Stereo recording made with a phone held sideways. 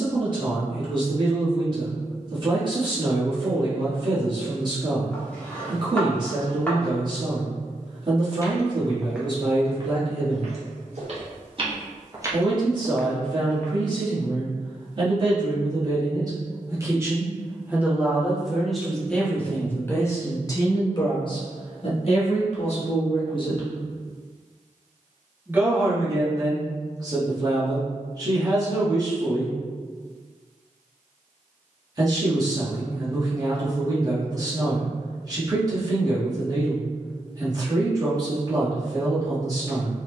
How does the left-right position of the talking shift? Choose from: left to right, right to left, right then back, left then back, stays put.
left then back.